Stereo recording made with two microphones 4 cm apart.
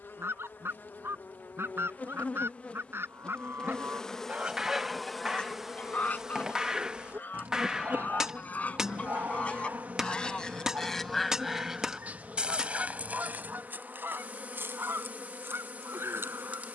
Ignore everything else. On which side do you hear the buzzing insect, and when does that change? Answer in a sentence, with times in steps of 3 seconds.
You can hear the buzzing insect on the left from 0 s, in the centre from 3 s and on the right from 6 s.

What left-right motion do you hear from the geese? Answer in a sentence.
You can hear the geese move from right to left and back again.